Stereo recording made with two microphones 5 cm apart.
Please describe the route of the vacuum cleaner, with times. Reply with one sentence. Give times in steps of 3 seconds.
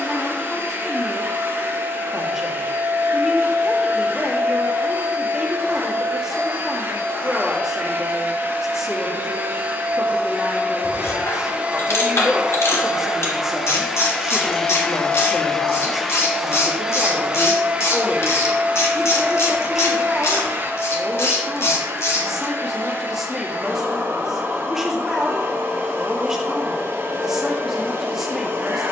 You can hear the vacuum cleaner on the right from 0 s, in the centre from 12 s and on the right from 18 s.